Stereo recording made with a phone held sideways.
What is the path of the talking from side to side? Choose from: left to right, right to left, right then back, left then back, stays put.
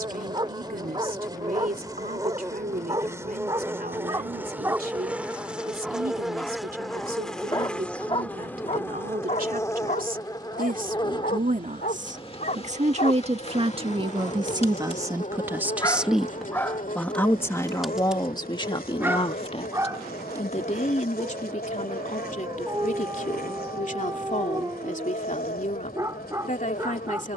right to left.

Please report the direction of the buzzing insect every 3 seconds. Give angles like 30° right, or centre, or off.
20° right, 10° right, 10° left, 30° left, 40° left, 60° left, 70° left, 70° left, 70° left.